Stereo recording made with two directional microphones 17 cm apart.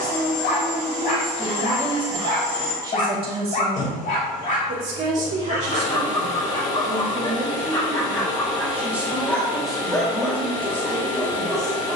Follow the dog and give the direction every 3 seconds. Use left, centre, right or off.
left, left, left, centre.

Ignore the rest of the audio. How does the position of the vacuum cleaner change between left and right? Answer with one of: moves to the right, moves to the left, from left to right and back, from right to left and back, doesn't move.
doesn't move.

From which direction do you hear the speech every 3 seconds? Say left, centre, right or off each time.
centre, right, right, centre.